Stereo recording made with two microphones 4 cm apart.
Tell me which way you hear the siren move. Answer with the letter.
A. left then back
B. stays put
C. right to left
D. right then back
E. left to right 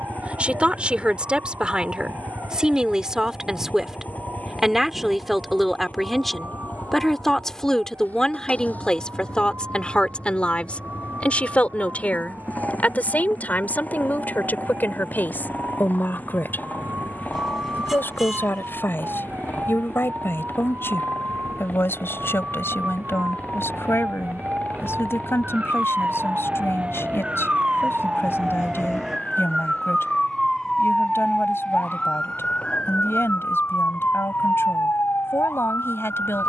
C.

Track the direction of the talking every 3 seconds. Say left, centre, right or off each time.
right, centre, centre, left, left, left, left, left, left, left, left, left.